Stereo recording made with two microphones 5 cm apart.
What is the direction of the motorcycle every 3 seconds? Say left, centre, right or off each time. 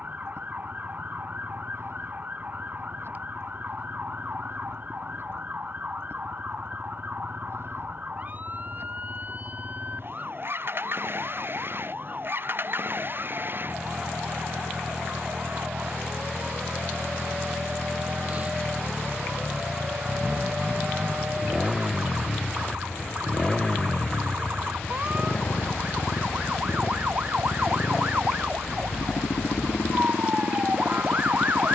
right, right, right, right, right, right, right, centre, left, left, left.